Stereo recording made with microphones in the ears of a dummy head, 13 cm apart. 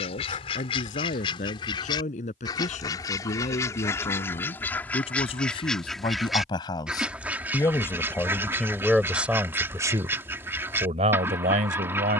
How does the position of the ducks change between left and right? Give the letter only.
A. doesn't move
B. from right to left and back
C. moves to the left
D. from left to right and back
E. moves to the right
E.